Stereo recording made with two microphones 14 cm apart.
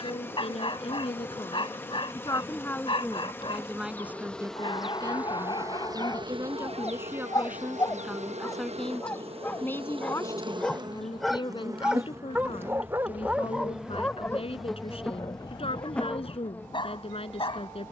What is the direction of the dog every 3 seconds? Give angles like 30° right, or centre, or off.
40° left, 30° left, 30° left, 10° left, centre, 30° left.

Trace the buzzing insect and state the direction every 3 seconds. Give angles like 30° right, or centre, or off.
20° left, centre, 50° right, 30° right, 10° right, 10° left.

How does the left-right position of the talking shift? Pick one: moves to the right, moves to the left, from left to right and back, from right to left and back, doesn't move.
from left to right and back.